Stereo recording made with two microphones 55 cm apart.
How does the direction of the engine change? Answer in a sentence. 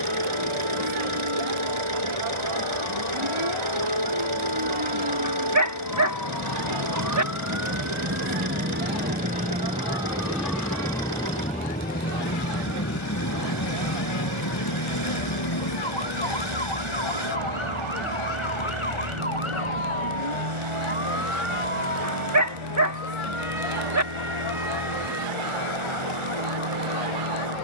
In this clip you hear the engine stay put.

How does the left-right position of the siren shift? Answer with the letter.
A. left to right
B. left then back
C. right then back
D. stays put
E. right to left
E.